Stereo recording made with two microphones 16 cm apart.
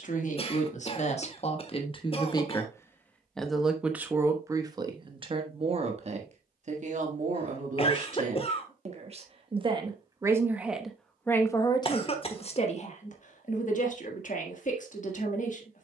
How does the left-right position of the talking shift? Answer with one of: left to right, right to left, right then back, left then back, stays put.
right then back.